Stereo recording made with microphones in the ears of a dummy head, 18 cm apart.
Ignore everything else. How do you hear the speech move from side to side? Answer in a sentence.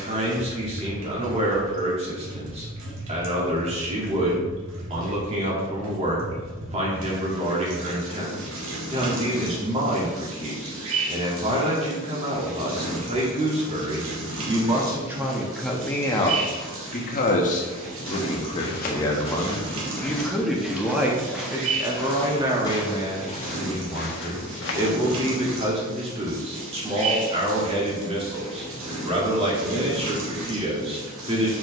You can hear the speech go left and come back.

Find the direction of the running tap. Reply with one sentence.
You can hear the running tap on the right.